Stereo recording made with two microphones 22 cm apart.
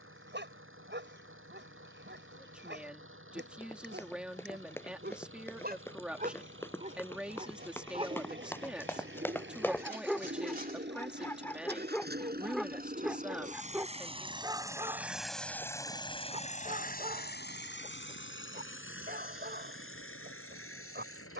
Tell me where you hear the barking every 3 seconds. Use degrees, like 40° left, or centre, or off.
60° right, 50° right, 30° right, centre, 10° right, 30° right, 50° right.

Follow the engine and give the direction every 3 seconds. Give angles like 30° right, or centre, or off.
70° right, 70° right, 60° right, 60° right, 30° right, 30° left, 70° left.